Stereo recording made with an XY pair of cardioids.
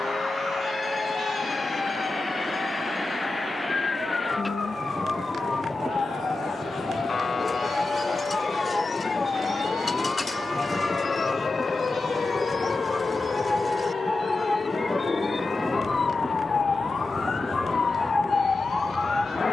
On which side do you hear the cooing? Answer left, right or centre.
left.